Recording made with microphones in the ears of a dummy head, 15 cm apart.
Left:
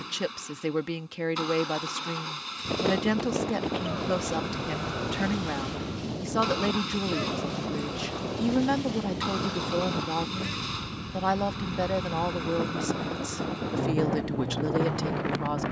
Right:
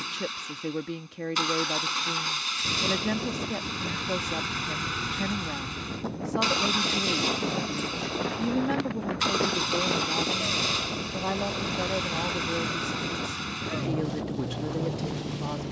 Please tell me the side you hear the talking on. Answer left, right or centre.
left.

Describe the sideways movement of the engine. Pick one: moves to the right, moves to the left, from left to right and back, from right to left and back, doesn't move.
doesn't move.